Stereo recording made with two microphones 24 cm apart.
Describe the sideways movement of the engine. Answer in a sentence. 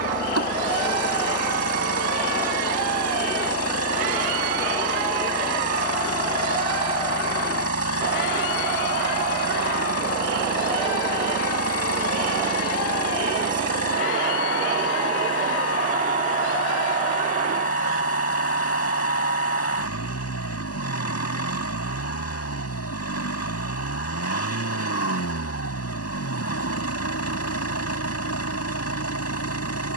In this clip you hear the engine stay put.